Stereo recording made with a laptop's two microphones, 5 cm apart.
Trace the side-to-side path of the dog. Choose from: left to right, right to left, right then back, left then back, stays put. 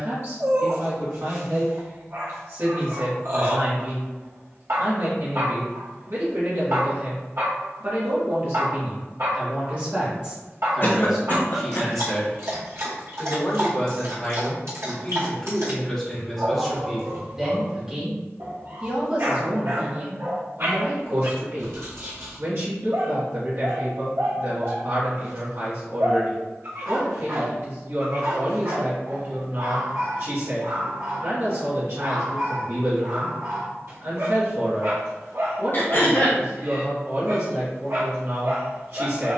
stays put.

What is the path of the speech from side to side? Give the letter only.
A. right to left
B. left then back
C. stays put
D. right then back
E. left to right
B.